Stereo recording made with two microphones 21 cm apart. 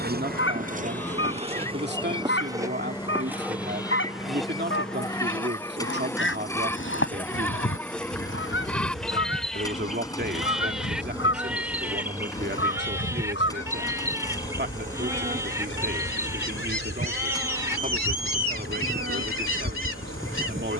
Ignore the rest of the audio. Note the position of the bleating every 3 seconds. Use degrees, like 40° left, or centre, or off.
10° left, 20° left, 10° left, centre, 10° right, 10° right, 10° right.